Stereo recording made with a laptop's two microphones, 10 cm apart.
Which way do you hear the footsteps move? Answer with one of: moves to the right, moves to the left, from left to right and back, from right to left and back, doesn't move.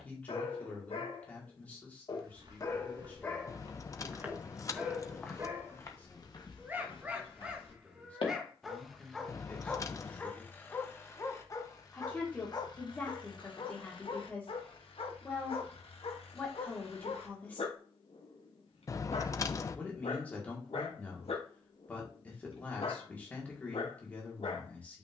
moves to the left.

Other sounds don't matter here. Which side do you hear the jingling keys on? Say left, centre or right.
left.